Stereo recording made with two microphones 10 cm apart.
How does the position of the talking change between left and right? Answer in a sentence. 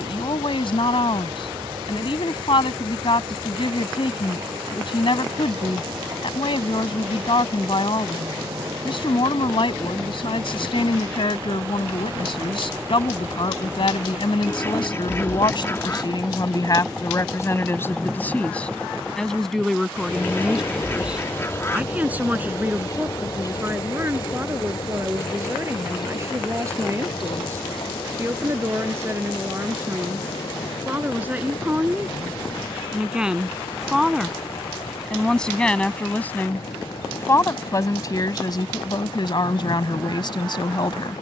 You can hear the talking move from left to right and back again.